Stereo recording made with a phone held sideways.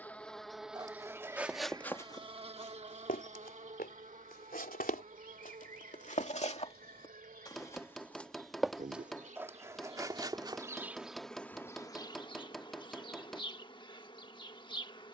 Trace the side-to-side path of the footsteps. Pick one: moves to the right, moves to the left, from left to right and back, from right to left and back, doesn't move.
from right to left and back.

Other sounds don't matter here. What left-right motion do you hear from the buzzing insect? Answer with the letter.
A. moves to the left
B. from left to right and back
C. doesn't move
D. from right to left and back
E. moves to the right
B.